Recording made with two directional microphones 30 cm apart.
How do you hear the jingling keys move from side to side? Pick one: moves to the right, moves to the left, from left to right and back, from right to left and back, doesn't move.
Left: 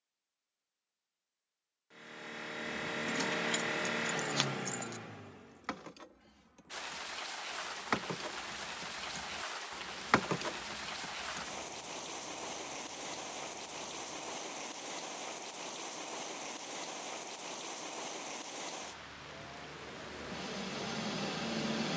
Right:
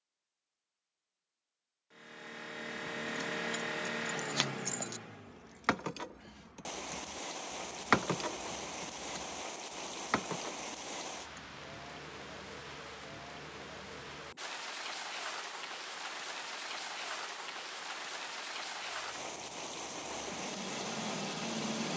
from left to right and back.